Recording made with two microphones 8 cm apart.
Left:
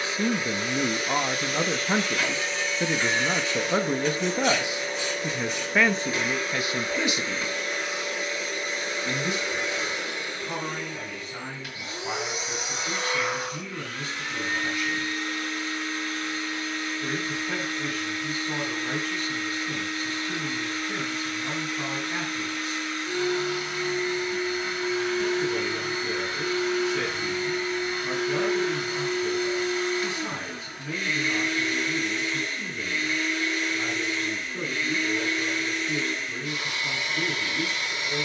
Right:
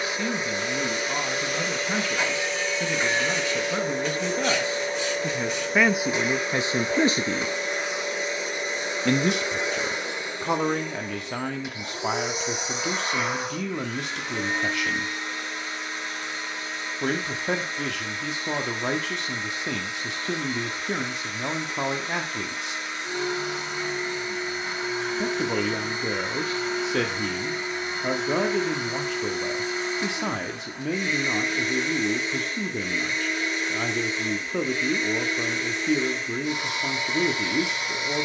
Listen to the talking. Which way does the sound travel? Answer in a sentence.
You can hear the talking move to the right.